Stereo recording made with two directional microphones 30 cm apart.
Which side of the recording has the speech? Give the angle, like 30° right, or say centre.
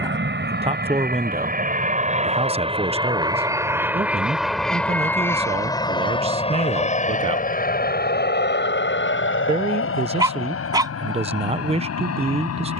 20° right.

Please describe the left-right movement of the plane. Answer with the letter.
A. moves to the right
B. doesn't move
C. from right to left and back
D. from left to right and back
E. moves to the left
E.